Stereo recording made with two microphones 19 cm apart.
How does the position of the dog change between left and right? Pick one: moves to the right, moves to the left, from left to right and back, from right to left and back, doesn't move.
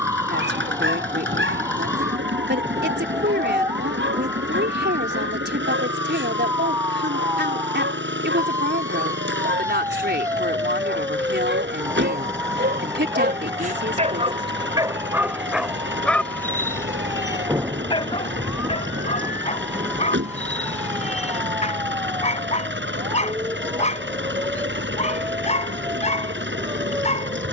moves to the left.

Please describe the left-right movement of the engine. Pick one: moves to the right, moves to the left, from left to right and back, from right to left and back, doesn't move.
doesn't move.